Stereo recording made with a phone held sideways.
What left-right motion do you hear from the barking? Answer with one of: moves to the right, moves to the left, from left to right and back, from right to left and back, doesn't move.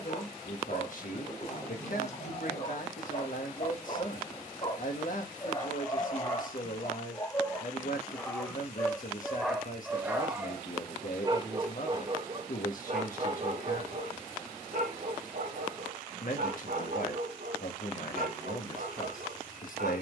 moves to the right.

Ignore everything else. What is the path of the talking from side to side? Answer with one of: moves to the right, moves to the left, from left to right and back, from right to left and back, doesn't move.
doesn't move.